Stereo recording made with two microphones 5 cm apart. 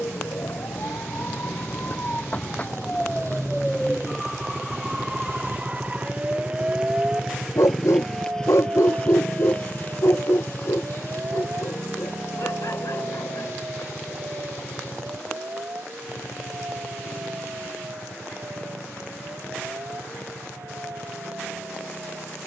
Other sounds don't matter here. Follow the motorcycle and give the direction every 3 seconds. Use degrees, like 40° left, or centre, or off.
70° right, 50° right, centre, 40° left, 60° left, 70° left, 70° left, 70° left.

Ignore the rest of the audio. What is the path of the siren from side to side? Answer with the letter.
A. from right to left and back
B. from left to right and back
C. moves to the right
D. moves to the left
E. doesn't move
C.